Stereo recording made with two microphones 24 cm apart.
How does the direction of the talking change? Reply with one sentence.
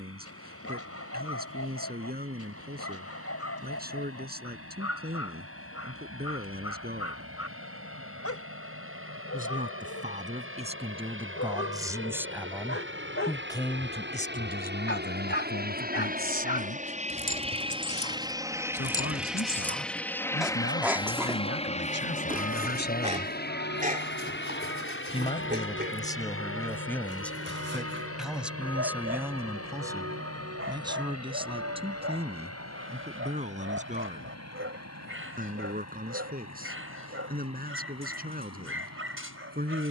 You can hear the talking go left and come back.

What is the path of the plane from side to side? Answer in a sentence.
You can hear the plane move to the left.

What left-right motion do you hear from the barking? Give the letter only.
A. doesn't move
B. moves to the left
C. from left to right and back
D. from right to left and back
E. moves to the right
E.